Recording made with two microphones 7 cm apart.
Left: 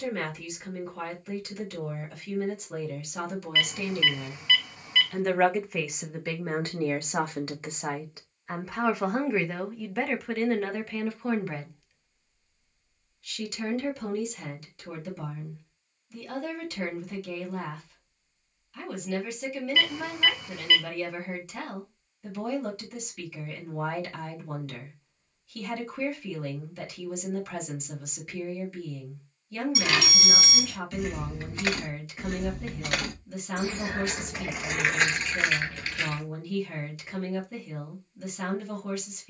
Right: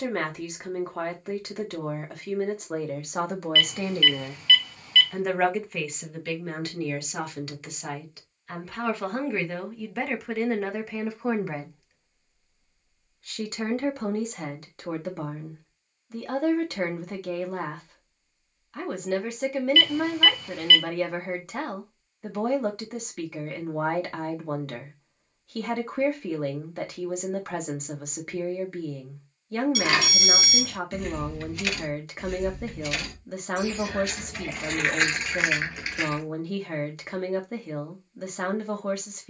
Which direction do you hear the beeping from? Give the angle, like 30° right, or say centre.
20° left.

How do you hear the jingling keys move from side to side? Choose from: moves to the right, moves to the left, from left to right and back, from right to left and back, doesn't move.
from right to left and back.